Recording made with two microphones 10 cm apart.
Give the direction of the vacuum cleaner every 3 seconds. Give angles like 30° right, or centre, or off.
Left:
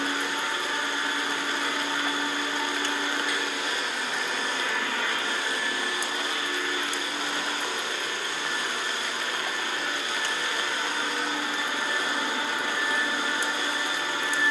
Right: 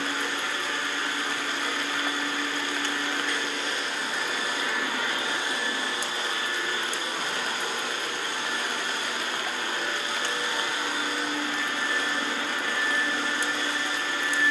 20° left, 10° right, 40° right, 20° right, 10° left.